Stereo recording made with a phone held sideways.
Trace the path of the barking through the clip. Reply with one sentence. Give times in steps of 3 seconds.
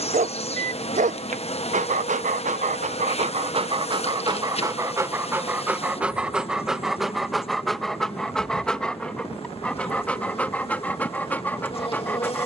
In this clip you hear the barking on the right from 0 s and in the centre from 6 s.